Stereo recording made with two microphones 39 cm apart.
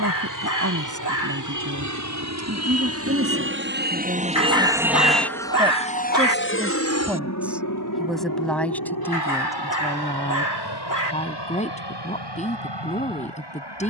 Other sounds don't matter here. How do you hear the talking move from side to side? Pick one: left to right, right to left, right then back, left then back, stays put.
right to left.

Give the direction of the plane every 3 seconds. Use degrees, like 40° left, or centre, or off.
50° right, 10° right, 40° left, 70° left, 70° left.